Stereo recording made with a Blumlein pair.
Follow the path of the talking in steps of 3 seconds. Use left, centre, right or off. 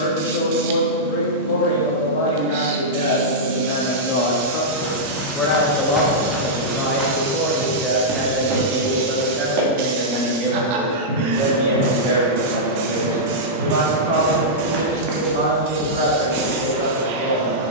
left, left, centre, right, right, right.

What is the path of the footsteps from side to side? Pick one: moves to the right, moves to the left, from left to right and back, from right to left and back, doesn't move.
from left to right and back.